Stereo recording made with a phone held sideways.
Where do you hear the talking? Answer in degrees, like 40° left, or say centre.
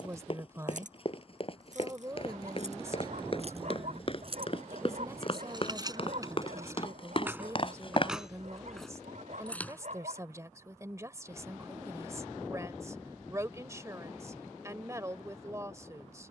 20° right.